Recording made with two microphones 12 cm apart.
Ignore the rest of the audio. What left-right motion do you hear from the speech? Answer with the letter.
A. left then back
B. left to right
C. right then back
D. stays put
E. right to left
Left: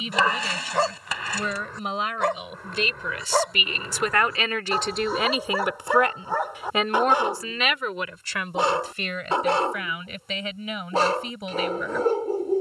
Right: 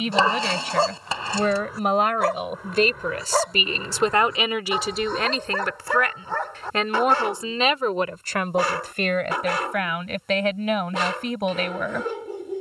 A.